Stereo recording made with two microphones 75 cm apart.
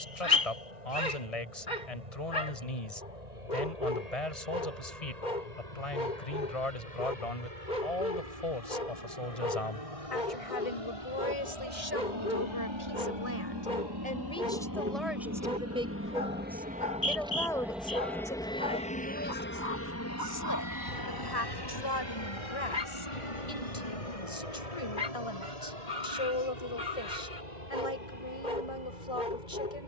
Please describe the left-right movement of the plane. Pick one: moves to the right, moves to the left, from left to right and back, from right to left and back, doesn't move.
moves to the left.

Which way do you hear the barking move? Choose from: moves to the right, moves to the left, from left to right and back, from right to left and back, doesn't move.
doesn't move.